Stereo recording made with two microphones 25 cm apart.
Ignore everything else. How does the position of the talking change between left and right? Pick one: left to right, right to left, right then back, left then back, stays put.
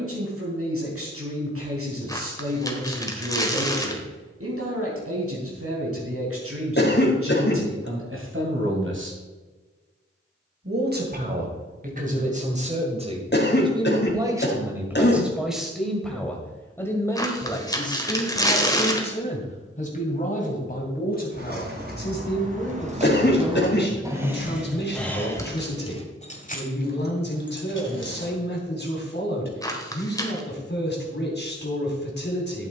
right to left.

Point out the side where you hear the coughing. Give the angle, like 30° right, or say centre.
40° left.